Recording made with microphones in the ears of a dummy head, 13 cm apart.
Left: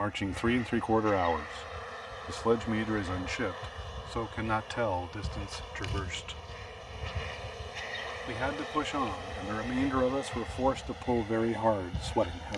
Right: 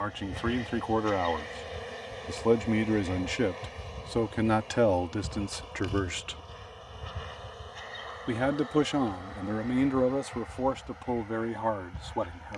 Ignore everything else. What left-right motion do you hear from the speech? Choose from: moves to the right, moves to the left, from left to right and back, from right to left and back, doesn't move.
from left to right and back.